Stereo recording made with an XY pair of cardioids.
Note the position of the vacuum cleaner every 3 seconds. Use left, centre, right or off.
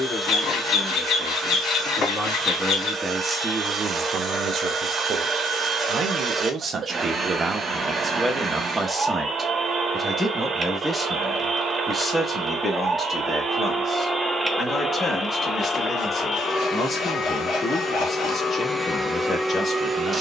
right, right, right, right, right, left, centre.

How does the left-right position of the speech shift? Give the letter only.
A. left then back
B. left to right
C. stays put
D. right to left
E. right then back
E.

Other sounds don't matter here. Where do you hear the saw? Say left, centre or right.
left.